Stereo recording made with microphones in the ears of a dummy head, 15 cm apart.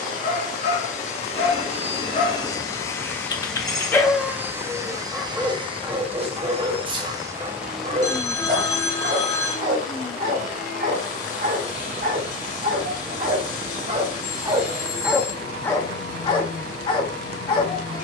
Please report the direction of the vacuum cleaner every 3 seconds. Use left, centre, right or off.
left, centre, centre, left, left, left.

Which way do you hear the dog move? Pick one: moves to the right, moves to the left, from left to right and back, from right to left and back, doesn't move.
from left to right and back.